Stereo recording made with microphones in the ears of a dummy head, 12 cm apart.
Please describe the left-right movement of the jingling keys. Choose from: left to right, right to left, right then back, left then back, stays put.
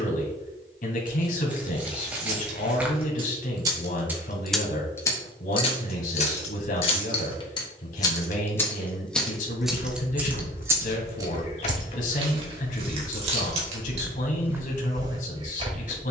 left then back.